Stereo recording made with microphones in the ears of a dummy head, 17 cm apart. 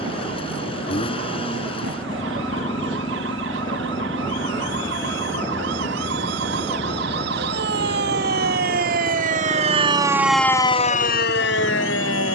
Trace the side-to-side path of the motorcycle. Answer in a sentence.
In this clip you hear the motorcycle stay in one place.